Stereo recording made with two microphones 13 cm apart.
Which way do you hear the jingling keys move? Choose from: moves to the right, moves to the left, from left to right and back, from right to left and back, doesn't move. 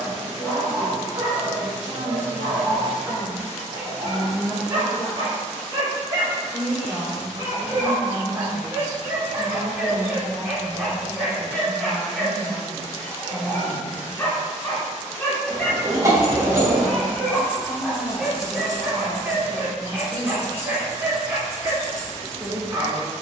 moves to the left.